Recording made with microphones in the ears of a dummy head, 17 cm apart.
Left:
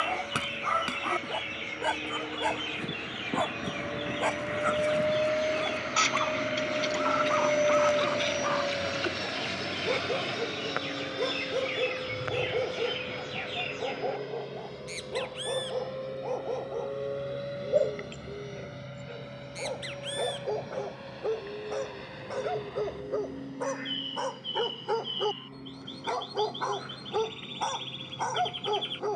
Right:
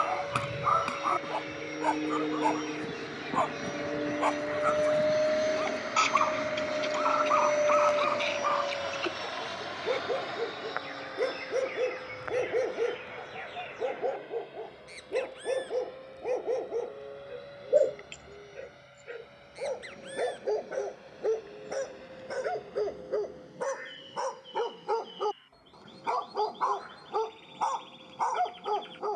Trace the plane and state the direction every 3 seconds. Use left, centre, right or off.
right, right, centre, left, left, left, left, left, left, left.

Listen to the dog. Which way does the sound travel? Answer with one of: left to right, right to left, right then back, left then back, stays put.
right then back.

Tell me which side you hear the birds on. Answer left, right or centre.
left.